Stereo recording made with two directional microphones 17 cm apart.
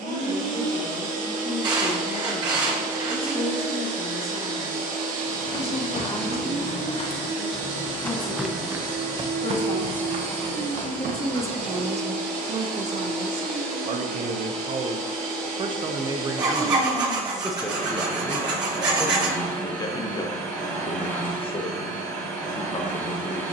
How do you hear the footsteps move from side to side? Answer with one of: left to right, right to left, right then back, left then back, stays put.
left to right.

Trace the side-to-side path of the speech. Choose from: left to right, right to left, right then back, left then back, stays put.
right then back.